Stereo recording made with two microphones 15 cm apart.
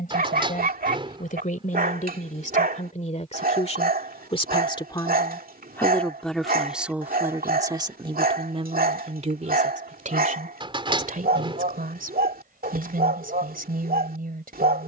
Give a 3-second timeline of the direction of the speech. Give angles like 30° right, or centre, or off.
60° left, 30° left, 20° right, 50° right, 70° right.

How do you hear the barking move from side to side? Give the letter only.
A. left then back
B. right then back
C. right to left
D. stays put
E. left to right
D.